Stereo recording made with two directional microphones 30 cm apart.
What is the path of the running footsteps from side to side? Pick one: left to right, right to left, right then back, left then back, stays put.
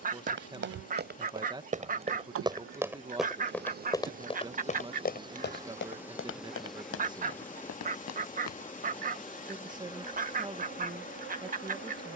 right to left.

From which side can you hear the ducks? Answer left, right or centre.
right.